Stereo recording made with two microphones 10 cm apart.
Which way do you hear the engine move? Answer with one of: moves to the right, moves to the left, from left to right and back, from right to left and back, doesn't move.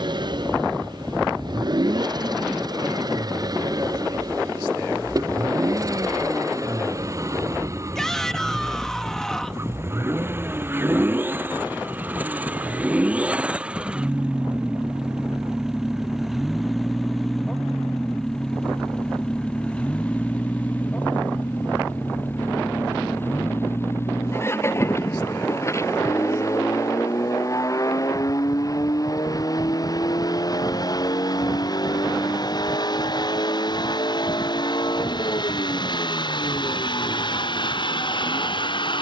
moves to the left.